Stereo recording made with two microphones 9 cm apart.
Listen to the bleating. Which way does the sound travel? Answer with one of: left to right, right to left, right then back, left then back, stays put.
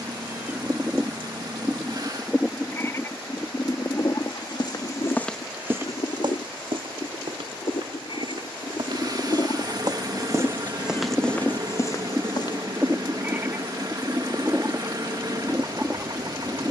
left then back.